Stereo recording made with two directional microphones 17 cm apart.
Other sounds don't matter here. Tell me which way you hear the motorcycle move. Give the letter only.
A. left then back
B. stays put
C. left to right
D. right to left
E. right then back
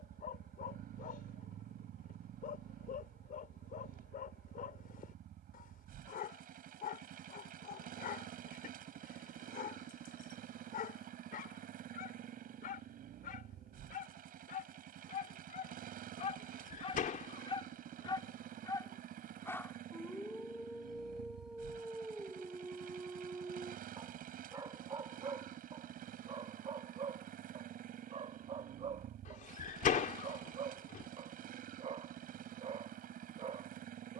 B.